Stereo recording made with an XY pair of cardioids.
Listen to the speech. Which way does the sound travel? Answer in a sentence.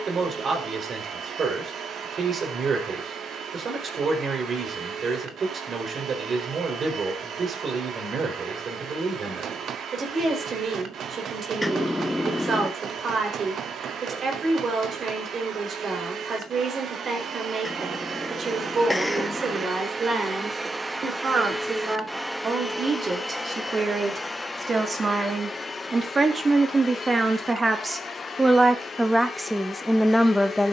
In this clip you hear the speech go from the right side to the left.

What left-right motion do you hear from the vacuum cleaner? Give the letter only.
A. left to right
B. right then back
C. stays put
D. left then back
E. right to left
E.